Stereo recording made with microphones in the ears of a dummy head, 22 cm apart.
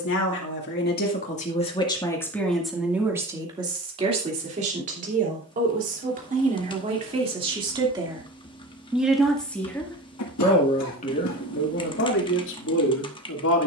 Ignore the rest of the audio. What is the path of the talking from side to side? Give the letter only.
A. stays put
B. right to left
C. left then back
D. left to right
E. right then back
E.